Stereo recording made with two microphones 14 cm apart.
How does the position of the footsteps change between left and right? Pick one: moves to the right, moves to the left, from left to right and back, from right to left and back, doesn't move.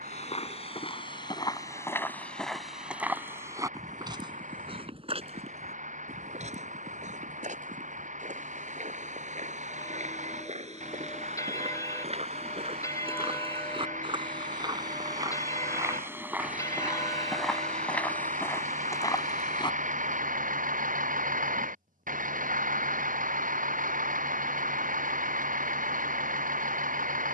from left to right and back.